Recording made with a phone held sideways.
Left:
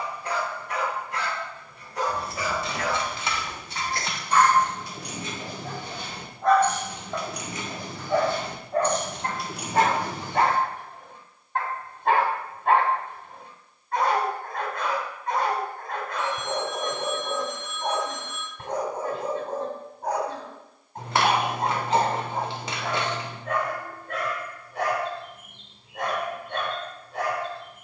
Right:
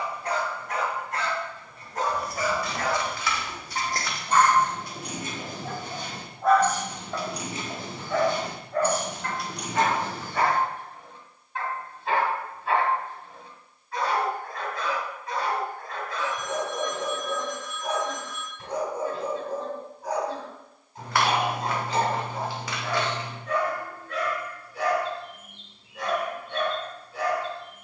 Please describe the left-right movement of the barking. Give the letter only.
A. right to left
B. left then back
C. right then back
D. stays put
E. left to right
A.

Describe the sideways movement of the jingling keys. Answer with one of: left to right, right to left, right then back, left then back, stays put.
right then back.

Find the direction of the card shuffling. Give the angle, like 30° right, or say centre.
20° left.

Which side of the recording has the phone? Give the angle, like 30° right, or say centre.
20° left.